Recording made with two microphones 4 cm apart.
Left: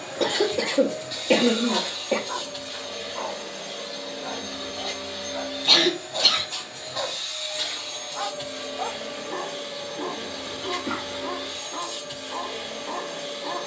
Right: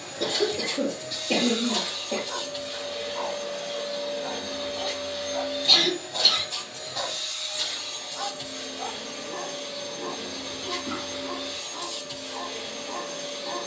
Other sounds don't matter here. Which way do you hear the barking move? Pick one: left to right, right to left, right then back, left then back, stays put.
right then back.